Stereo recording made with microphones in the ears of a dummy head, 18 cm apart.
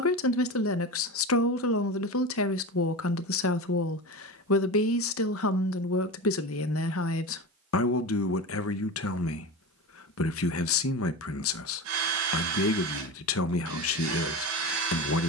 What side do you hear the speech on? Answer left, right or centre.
left.